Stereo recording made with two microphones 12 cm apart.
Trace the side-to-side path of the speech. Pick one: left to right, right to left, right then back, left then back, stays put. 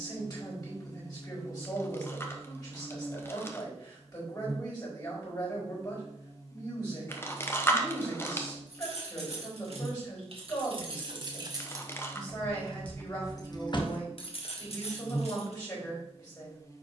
stays put.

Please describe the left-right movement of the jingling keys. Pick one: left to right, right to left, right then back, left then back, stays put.
right to left.